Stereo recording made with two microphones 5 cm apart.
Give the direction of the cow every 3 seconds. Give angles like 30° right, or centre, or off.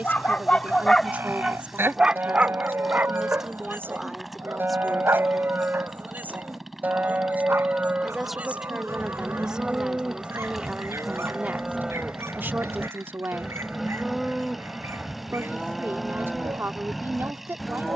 60° right, 50° right, 40° right, 20° right, 10° right, centre.